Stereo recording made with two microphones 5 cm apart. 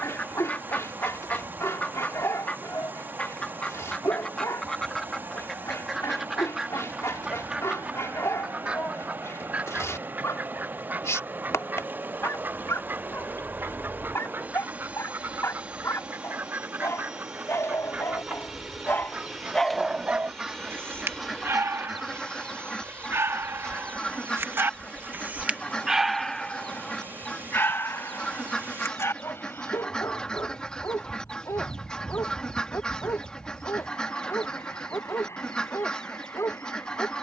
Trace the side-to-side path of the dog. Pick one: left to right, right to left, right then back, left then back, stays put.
right then back.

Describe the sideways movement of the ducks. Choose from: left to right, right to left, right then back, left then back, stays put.
right then back.